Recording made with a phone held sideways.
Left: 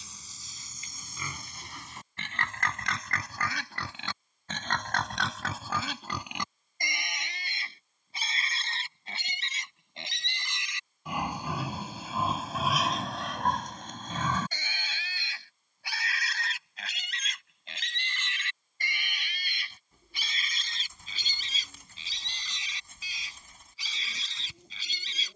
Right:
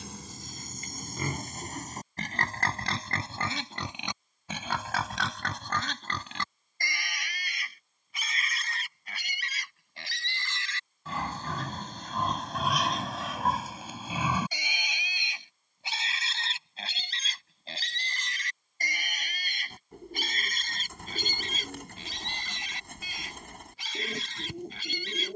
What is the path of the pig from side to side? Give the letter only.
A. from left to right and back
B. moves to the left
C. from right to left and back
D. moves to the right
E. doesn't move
C.